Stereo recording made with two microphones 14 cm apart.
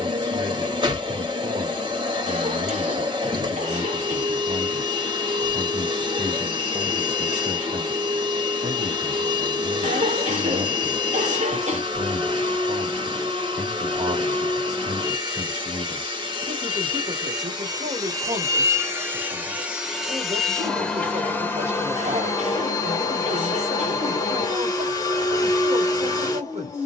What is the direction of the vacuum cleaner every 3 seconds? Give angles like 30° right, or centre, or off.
30° right, 30° right, 30° right, 30° right, 30° right, 30° right, 10° right, 20° left, 30° left.